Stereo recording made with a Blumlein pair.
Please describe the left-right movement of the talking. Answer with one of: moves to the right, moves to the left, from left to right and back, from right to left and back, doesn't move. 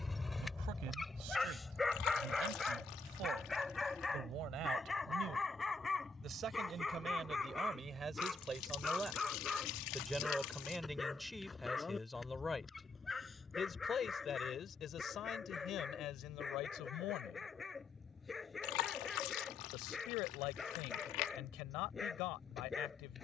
moves to the left.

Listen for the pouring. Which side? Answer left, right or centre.
left.